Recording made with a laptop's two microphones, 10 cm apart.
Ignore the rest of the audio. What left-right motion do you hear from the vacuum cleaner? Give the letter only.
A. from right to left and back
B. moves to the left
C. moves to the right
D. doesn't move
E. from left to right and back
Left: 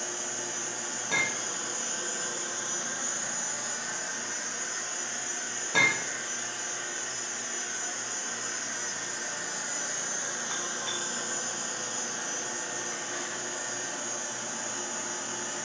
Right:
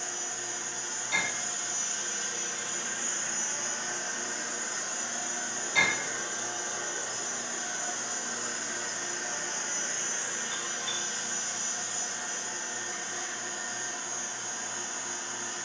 E.